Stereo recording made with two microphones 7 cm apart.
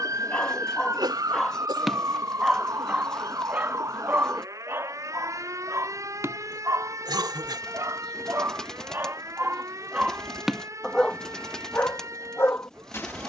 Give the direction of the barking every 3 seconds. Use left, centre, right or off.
centre, right, right, centre, left.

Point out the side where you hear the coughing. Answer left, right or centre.
right.